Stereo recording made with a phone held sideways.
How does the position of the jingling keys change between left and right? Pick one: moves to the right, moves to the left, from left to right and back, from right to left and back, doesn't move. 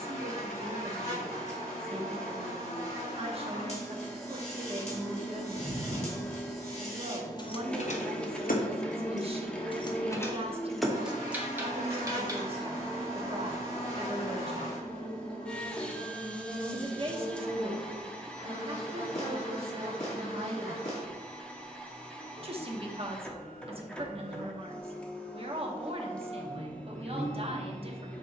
from right to left and back.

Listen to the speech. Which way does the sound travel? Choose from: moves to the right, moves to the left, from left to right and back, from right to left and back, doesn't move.
doesn't move.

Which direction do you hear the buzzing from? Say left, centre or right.
left.